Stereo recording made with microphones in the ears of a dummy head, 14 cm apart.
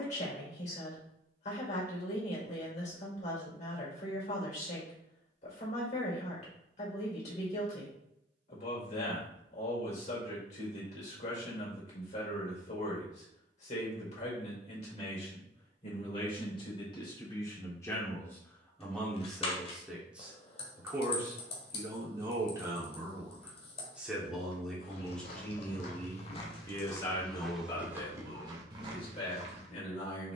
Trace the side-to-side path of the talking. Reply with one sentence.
You can hear the talking go right and come back.